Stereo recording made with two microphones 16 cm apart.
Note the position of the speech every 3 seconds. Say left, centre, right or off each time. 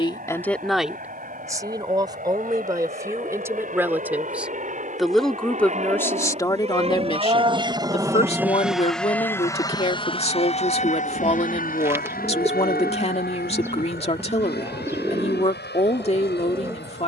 centre, centre, left, left, left, left.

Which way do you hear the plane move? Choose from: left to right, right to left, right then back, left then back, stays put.
right to left.